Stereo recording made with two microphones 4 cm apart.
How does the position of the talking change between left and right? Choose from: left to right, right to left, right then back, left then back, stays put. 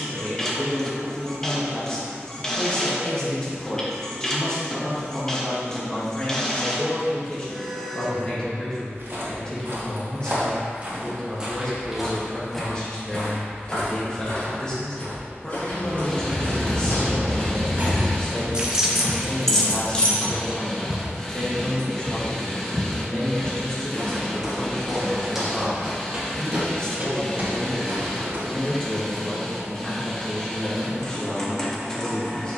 stays put.